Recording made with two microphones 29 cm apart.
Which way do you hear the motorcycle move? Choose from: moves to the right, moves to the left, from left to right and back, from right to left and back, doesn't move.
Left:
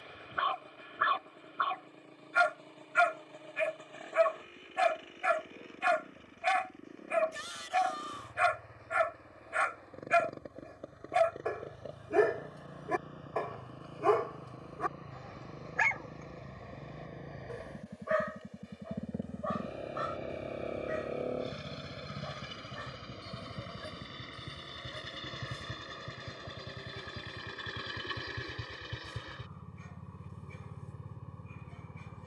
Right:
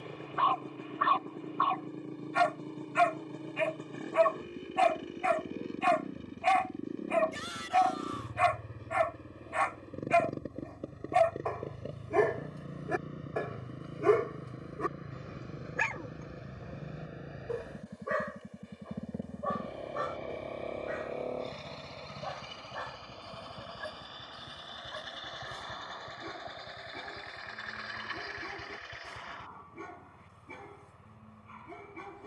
moves to the left.